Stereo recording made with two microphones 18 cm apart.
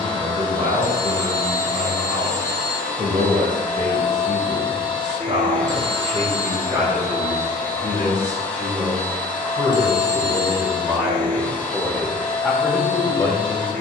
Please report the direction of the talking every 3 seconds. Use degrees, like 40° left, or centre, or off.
40° right, 40° right, 30° right, 20° right, 10° left.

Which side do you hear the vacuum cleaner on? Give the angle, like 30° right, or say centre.
10° left.